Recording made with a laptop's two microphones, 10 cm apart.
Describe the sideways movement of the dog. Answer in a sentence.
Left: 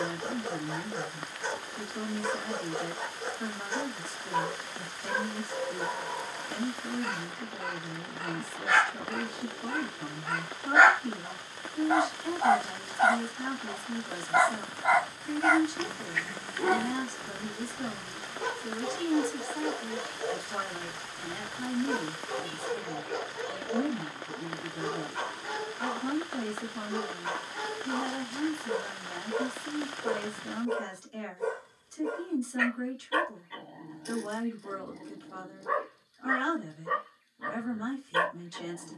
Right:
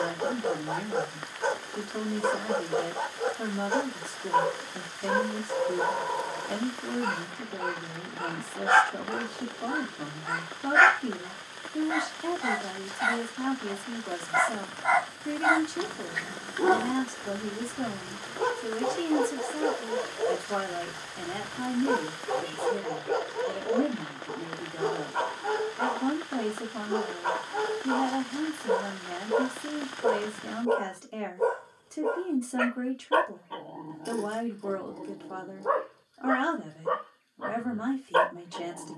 In this clip you hear the dog go left and come back.